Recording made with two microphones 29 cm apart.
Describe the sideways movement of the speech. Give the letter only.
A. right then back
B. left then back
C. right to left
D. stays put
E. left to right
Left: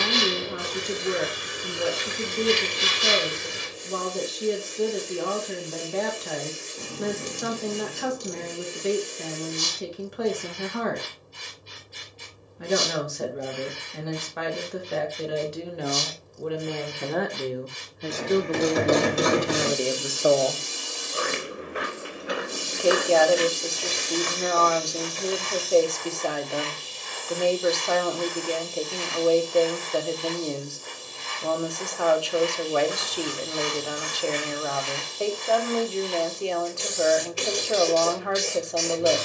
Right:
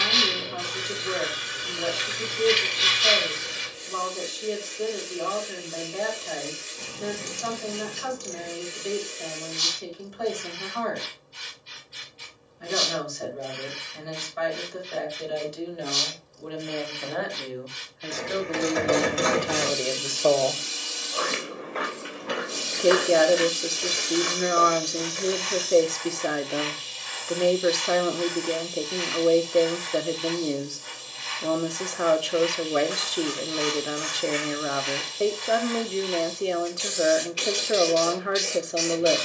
E.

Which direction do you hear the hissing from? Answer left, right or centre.
left.